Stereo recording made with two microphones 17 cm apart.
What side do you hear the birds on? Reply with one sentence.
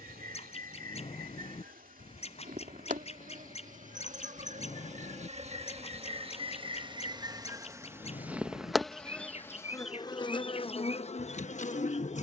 In this clip you hear the birds on the left.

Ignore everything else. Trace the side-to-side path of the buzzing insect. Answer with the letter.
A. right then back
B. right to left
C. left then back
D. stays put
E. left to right
B.